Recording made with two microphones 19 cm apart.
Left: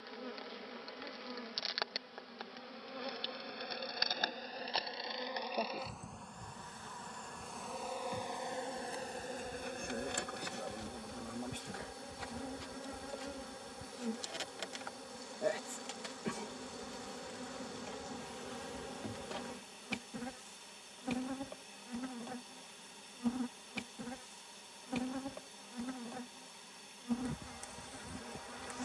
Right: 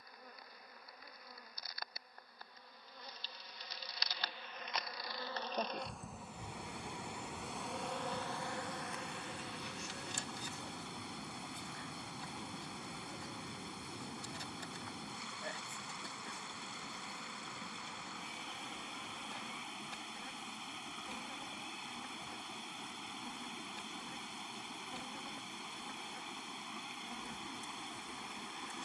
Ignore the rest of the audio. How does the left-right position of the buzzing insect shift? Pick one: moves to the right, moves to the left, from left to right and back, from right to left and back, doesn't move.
from left to right and back.